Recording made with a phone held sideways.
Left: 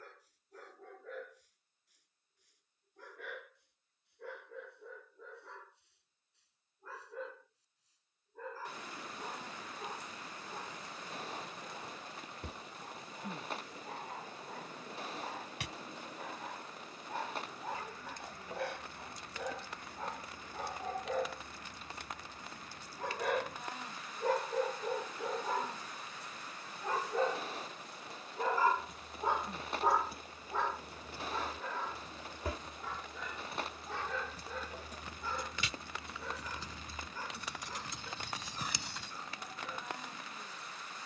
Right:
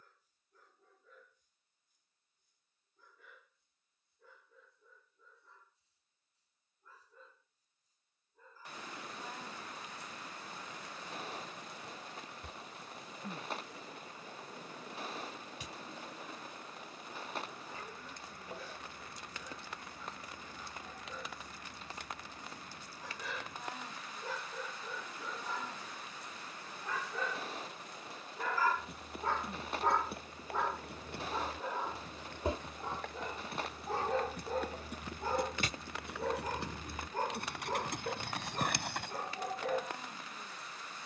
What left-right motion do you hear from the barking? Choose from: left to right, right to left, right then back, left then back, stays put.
left to right.